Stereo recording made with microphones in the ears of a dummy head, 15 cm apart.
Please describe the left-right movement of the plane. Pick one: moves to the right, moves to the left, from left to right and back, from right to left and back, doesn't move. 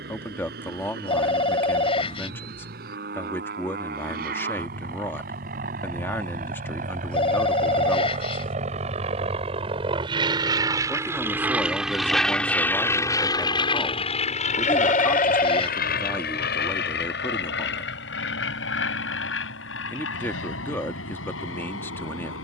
moves to the left.